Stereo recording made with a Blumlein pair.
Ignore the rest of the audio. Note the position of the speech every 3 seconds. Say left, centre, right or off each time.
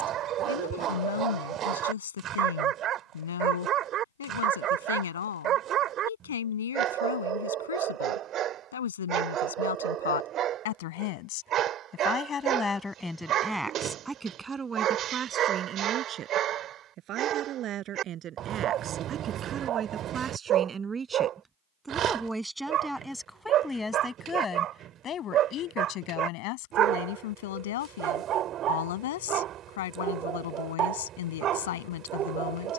left, left, left, left, centre, right, right, centre, left, left, left.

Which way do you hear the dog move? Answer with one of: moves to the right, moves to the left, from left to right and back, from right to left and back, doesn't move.
doesn't move.